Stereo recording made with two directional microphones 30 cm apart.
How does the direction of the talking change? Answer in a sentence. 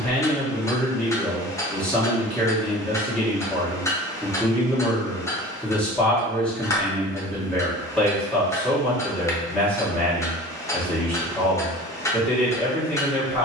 In this clip you hear the talking stay put.